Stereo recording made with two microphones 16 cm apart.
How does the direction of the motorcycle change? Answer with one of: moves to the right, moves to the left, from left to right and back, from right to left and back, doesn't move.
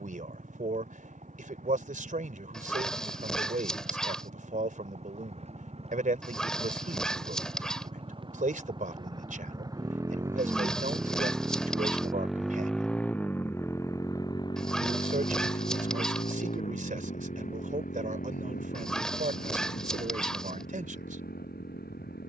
moves to the left.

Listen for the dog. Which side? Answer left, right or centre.
centre.